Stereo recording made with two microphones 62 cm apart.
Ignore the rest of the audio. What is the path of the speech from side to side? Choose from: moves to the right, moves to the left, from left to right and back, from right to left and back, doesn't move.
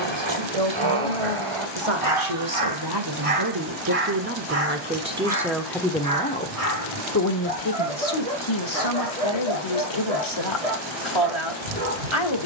moves to the left.